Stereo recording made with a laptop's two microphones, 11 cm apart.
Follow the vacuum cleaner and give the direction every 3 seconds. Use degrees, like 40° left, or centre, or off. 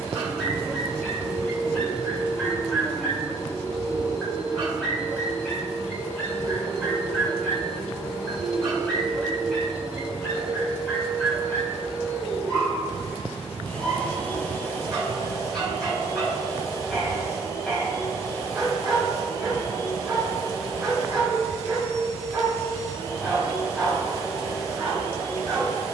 30° left, 30° left, 10° left, 10° right, 10° left, 30° left, 30° left, 30° left, 30° left.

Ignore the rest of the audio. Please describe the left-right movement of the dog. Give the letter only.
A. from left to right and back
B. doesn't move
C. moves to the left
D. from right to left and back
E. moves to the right
B.